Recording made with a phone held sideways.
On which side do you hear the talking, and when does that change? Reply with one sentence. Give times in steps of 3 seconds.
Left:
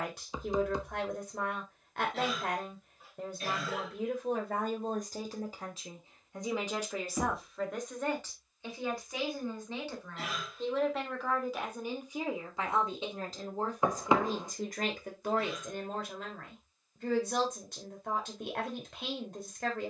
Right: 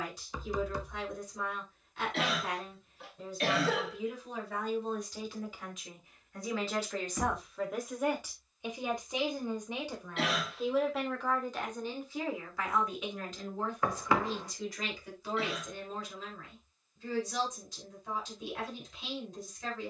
You can hear the talking on the left from 0 s, in the centre from 6 s and on the left from 12 s.